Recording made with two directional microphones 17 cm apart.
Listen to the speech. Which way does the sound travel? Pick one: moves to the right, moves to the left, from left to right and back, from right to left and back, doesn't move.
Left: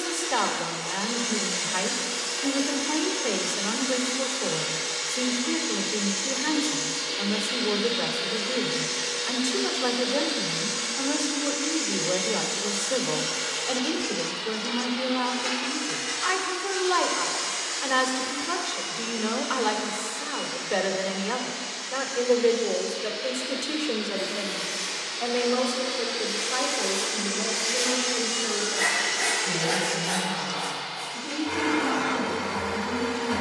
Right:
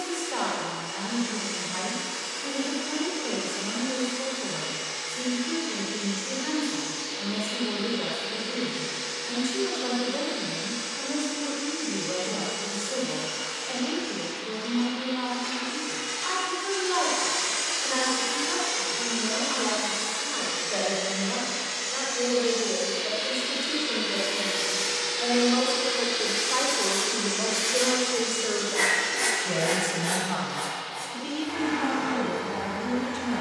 moves to the right.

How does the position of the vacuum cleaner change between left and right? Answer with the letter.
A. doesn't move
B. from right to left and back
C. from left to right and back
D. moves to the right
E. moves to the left
C.